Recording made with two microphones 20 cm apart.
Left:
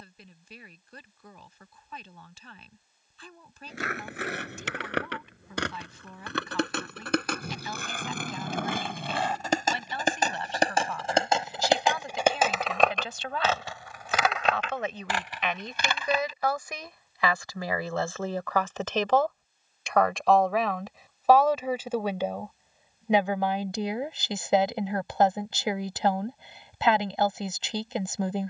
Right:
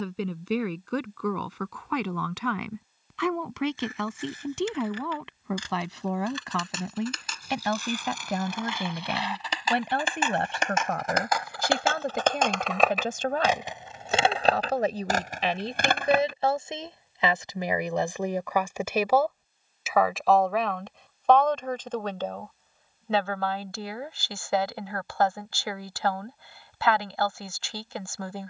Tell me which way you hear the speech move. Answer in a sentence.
You can hear the speech move from right to left.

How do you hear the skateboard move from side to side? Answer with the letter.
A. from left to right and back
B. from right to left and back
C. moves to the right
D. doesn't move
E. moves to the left
C.